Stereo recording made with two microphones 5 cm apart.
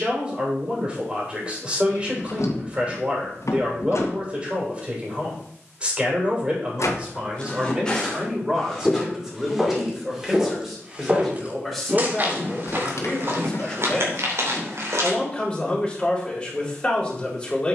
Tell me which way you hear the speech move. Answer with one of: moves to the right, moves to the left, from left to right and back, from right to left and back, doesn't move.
moves to the left.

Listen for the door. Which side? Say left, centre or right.
left.